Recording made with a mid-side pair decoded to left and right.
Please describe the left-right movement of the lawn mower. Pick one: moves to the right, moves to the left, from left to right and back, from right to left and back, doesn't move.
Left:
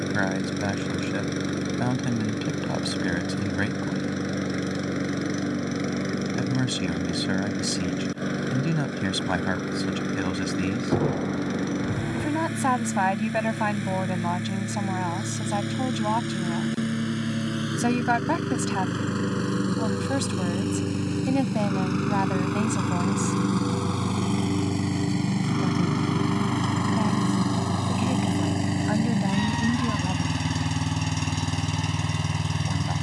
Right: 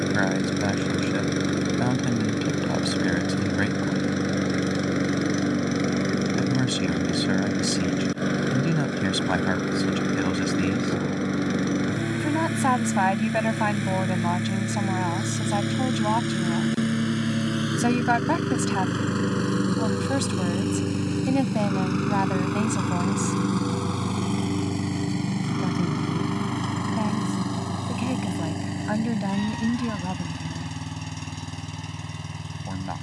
moves to the left.